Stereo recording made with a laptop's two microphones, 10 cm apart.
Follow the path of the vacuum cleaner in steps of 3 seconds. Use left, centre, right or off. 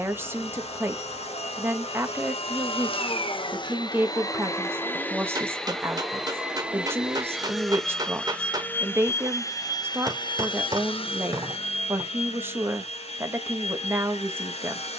left, left, centre, left, left.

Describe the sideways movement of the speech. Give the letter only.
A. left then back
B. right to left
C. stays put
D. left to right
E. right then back
C.